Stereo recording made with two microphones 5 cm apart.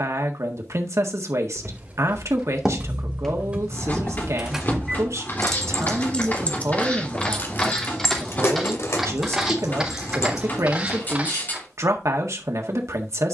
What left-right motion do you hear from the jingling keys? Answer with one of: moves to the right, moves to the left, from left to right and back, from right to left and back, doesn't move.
moves to the left.